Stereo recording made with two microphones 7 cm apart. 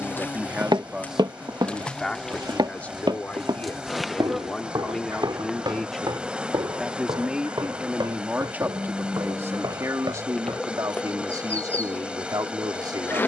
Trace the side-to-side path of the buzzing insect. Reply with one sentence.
In this clip you hear the buzzing insect go right and come back.